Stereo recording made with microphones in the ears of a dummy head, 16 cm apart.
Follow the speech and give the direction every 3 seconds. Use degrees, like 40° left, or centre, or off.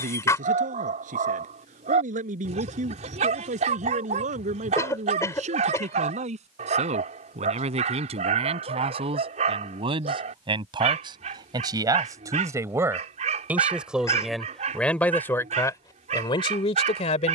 50° right, 40° right, 40° right, 30° right, 10° right, 30° left.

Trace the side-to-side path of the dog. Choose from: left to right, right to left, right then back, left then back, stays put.
stays put.